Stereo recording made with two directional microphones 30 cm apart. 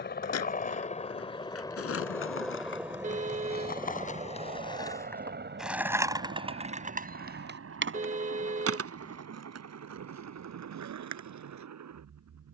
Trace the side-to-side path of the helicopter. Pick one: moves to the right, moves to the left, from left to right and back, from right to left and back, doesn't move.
moves to the right.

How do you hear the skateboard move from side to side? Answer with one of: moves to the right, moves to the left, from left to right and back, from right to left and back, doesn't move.
moves to the right.